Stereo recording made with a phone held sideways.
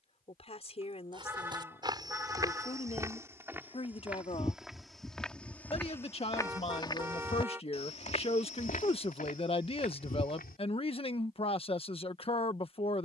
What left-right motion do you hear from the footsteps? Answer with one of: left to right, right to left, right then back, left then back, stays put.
right to left.